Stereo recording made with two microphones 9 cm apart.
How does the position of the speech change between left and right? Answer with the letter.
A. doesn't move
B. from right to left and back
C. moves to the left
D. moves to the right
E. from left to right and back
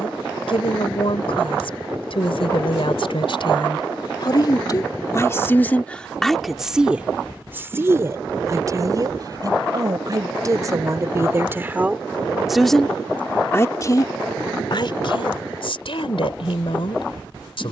E.